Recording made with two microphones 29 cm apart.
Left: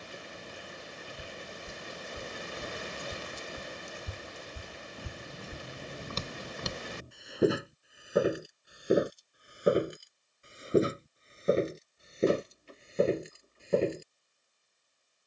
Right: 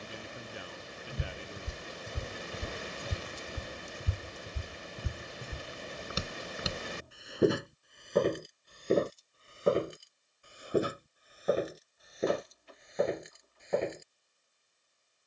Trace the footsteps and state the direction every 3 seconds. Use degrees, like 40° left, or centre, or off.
50° right, 30° right, centre, 20° left, 30° left.